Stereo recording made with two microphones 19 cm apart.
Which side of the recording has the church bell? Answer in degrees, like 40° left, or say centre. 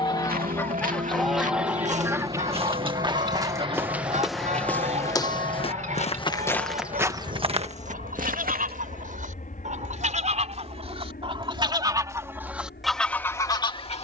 40° right.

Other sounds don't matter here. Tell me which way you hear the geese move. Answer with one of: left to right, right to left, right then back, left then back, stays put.
right then back.